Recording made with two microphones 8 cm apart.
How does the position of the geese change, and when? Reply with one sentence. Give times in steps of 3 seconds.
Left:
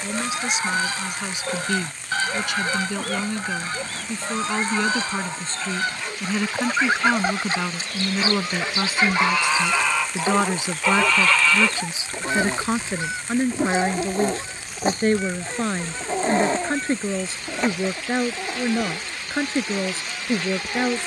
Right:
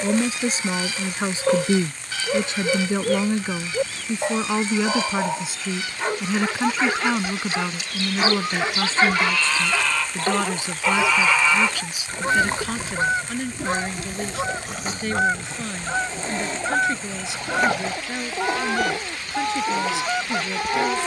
You can hear the geese on the left from 0 s, in the centre from 9 s and on the right from 12 s.